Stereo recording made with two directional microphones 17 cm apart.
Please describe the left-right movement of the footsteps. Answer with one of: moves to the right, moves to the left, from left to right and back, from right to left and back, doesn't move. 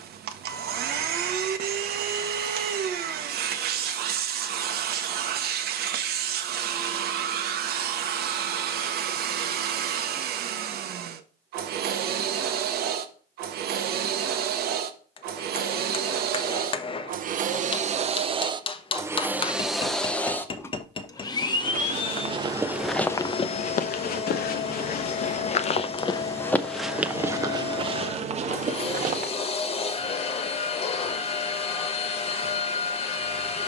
from right to left and back.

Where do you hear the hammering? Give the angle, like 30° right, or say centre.
30° left.